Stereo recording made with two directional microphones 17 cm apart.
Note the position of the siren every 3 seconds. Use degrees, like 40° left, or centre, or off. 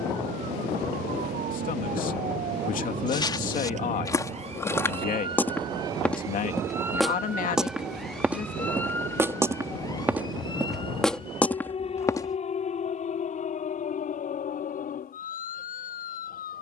60° right, 40° right, 10° right, 30° left, 40° left, 50° left.